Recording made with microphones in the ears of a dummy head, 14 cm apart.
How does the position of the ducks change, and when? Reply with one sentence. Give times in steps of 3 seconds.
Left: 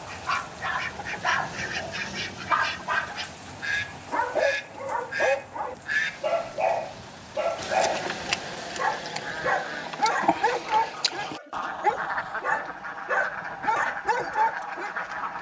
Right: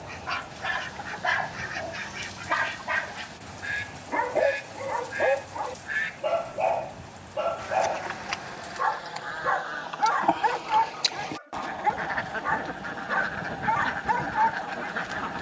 In this clip you hear the ducks on the left from 0 s, in the centre from 9 s and on the right from 12 s.